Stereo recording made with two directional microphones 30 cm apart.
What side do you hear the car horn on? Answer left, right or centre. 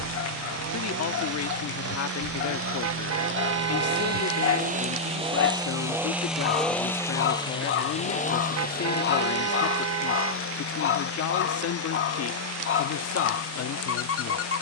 right.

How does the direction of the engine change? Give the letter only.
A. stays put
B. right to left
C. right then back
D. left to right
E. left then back
B.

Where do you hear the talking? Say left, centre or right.
left.